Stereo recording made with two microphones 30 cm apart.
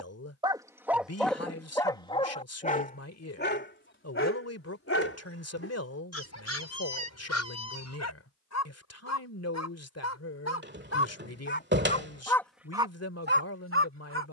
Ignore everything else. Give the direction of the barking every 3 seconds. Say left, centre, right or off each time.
centre, left, left, left, right.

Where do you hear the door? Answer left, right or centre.
right.